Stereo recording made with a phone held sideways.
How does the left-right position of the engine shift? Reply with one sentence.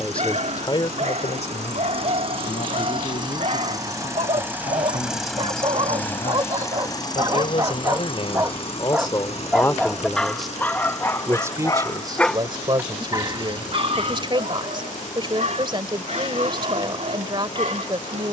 In this clip you hear the engine travel towards the left.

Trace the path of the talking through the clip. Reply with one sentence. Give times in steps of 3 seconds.
In this clip you hear the talking on the left from 0 s, in the centre from 9 s and on the right from 12 s.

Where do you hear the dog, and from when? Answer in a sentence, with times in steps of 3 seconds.
You can hear the dog on the right from 0 s, in the centre from 9 s and on the right from 12 s.